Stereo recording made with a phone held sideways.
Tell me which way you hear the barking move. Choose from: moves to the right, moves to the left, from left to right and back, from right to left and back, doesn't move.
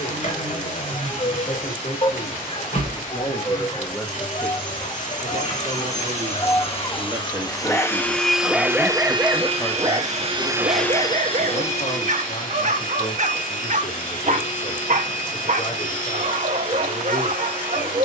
moves to the right.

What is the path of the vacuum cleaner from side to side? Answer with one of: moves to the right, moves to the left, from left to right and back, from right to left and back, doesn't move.
from left to right and back.